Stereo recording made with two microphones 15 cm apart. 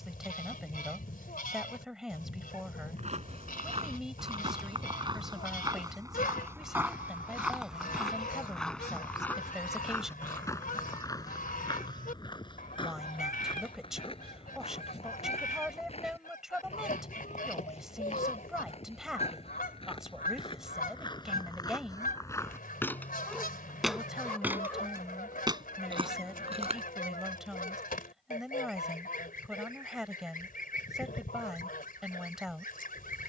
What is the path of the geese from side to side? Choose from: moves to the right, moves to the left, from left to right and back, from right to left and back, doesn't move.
doesn't move.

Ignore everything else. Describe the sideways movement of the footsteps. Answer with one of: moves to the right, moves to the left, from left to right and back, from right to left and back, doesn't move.
from right to left and back.